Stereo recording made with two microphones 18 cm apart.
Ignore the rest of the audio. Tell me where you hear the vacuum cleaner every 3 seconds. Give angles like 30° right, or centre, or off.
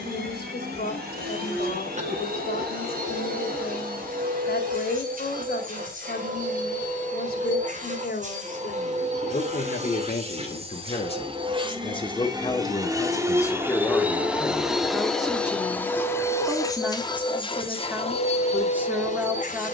60° right, 50° right, 50° right, 30° right, 10° right, 20° left, 40° left.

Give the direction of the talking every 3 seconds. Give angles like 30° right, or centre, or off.
60° left, 60° left, 50° left, 40° left, 10° left, 10° right, 10° right.